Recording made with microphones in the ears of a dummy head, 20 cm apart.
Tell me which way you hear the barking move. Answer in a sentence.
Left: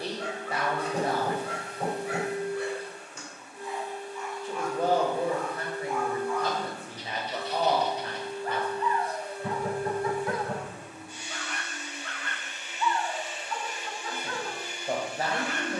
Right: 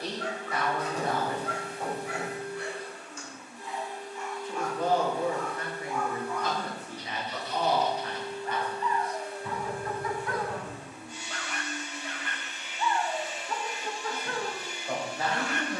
You can hear the barking travel towards the right.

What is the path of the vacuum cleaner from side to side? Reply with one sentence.
You can hear the vacuum cleaner stay in one place.